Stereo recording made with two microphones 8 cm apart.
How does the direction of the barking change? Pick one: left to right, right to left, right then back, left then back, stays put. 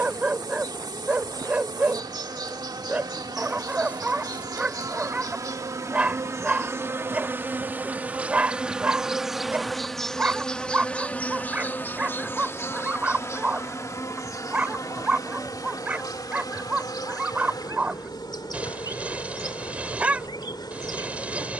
stays put.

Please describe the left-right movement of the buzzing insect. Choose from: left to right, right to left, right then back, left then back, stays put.
right to left.